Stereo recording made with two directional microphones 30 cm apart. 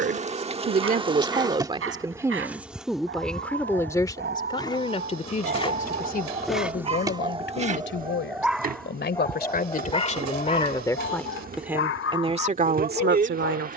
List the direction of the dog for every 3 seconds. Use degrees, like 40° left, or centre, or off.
50° right, 40° right, 10° right, 30° left, 50° left.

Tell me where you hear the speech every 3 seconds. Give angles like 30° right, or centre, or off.
20° right, 20° left, 40° left, 20° left, 30° right.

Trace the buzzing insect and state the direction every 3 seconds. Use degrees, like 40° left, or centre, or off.
10° right, 10° left, 20° right, 30° right, 30° right.